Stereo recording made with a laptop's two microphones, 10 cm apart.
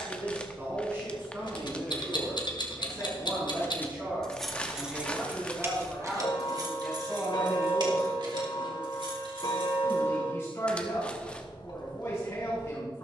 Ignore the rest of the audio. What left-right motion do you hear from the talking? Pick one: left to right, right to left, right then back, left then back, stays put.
right to left.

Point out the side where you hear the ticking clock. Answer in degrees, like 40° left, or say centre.
60° left.